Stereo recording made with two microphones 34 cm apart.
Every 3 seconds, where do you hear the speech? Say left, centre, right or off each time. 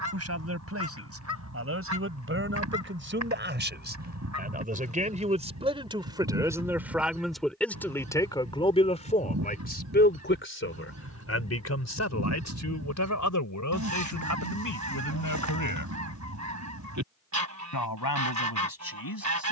right, right, centre, left, left, left, left.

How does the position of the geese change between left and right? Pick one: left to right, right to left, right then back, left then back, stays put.
stays put.